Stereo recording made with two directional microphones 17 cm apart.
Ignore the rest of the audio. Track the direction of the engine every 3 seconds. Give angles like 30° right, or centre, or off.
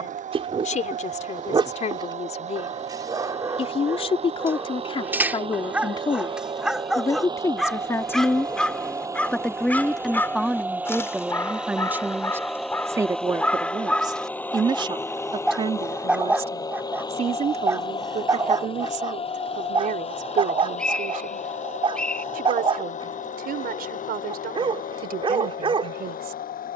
40° right, 40° right, 20° right, 10° right, 10° left, 20° left, 30° left, 40° left, 50° left.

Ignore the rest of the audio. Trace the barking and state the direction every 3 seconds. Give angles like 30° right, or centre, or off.
30° right, 10° right, centre, 10° left, 10° left, 10° right, 30° right, 30° right, 30° right.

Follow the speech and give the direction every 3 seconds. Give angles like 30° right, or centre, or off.
40° left, 30° left, 20° left, centre, 20° right, 40° right, 50° right, 60° right, 60° right.